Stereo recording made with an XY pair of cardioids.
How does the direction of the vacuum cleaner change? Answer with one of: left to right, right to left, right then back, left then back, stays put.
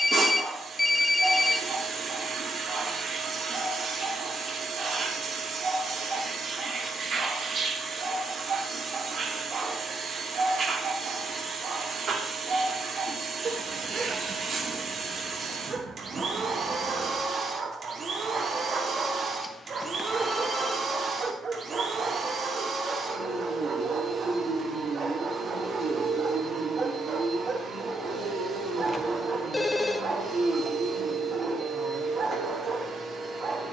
stays put.